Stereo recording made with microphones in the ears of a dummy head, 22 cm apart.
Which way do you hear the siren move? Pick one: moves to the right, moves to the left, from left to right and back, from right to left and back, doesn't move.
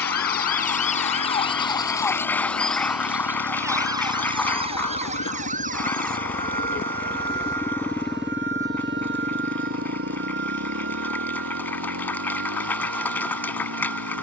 moves to the right.